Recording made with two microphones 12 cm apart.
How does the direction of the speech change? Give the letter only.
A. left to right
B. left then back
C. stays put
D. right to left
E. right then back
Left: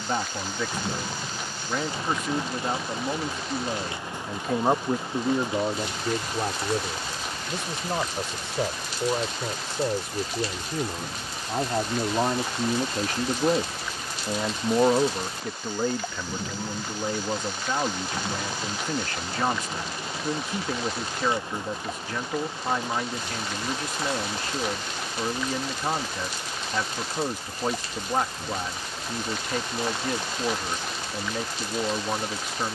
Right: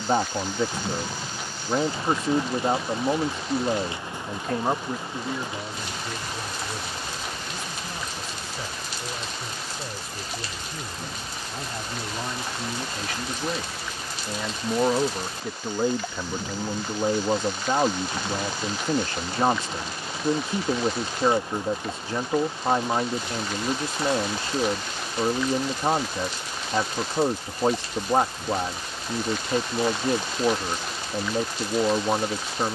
B.